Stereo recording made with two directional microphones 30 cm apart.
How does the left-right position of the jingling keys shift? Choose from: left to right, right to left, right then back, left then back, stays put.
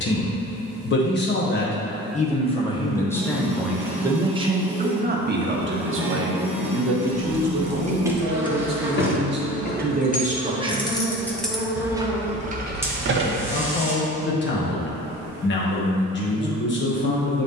left then back.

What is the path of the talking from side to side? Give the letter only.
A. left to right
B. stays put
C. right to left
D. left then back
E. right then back
E.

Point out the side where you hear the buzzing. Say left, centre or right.
centre.